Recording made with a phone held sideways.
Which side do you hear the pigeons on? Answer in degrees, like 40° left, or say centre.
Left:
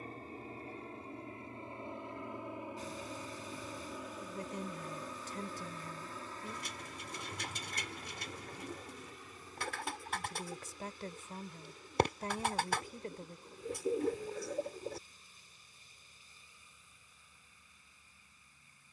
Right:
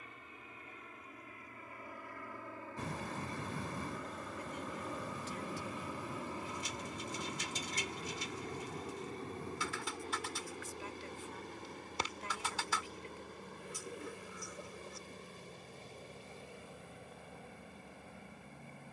60° left.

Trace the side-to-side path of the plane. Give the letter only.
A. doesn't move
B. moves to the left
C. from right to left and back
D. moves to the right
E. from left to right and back
D.